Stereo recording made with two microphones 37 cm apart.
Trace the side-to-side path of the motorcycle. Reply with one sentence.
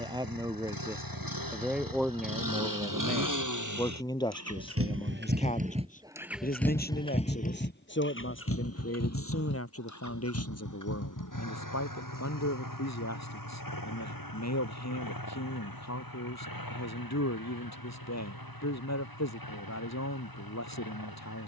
In this clip you hear the motorcycle move to the left.